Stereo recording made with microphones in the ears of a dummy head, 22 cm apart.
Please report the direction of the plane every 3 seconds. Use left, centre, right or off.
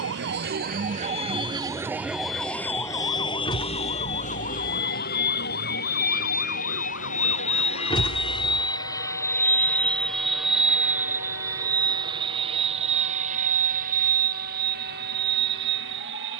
left, left, left, centre, right, right.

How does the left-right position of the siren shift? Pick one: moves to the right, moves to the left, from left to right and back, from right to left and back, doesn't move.
moves to the left.